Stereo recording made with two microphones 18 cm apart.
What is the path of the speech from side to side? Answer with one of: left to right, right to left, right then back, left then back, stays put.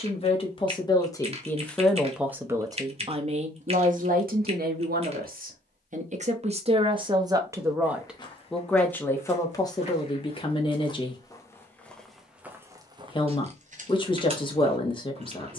right then back.